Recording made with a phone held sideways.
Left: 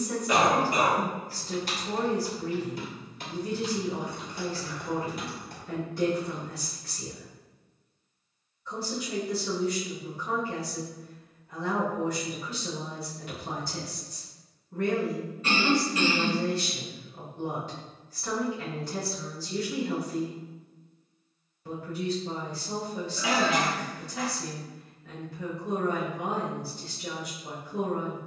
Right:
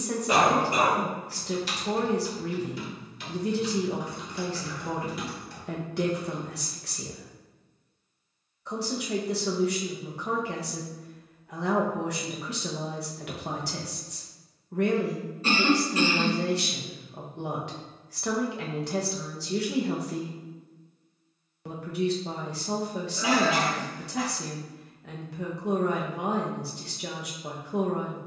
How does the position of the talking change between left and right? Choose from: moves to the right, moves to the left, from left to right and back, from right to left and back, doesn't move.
doesn't move.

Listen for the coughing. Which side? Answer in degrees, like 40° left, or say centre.
30° right.